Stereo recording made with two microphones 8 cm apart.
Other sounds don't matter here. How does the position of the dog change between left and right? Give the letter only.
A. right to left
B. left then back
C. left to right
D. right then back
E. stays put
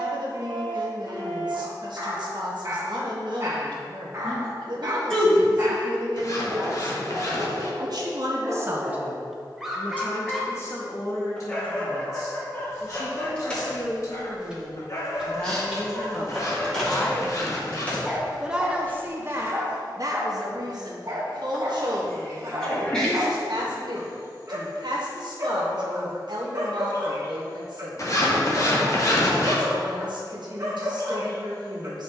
B.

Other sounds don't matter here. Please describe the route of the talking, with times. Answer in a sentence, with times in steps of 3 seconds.
You can hear the talking on the right from 0 s, on the left from 9 s and on the right from 18 s.